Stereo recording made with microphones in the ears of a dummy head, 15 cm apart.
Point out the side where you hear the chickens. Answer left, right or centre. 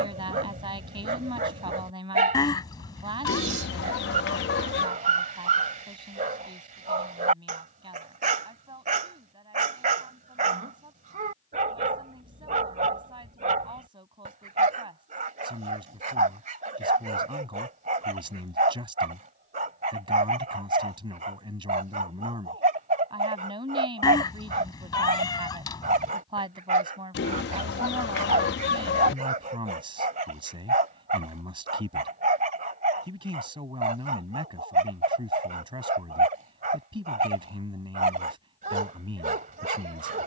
left.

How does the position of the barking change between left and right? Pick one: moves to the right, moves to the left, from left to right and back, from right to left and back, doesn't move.
doesn't move.